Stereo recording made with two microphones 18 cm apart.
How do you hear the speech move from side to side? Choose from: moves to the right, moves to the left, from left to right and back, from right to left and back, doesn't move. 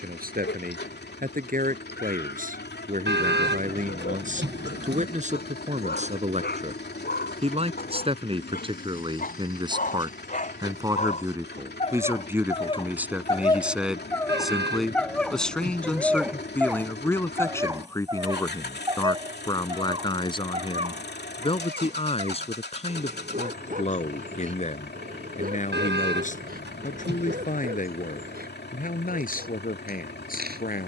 moves to the left.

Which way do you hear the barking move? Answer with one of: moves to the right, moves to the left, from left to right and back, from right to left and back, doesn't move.
moves to the right.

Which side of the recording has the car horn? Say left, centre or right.
right.